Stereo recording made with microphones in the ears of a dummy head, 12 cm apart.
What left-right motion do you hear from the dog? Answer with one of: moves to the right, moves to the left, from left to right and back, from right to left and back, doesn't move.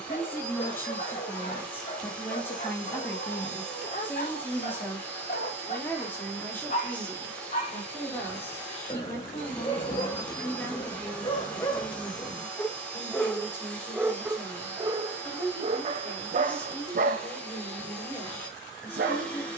moves to the right.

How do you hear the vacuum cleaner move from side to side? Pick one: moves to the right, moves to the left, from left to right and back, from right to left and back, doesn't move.
doesn't move.